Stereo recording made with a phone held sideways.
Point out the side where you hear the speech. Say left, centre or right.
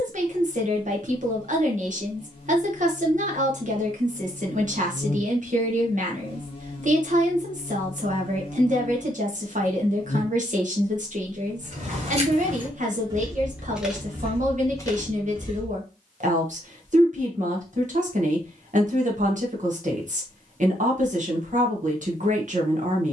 right.